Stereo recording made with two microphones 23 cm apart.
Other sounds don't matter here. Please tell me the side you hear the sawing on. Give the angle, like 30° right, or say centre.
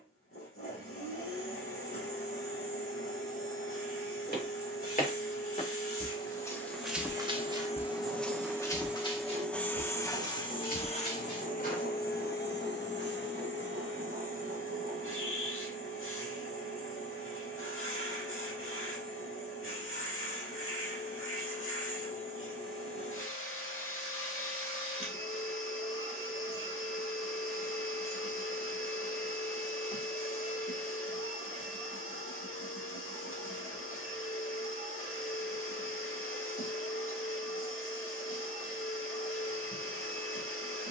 40° right.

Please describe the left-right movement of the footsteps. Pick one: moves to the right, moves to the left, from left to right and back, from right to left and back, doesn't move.
from left to right and back.